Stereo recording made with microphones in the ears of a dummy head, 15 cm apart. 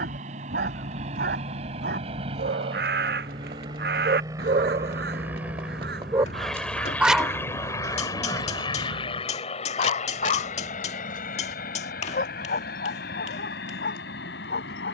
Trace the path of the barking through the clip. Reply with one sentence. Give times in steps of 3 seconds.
You can hear the barking on the right from 0 s, in the centre from 6 s and on the left from 9 s.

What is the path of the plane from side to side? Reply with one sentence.
You can hear the plane move from right to left.